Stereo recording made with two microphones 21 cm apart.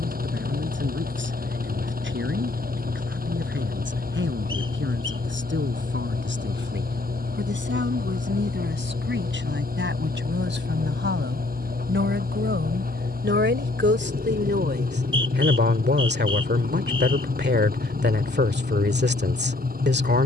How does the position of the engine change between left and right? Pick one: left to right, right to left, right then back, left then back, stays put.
stays put.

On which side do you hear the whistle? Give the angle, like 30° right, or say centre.
20° right.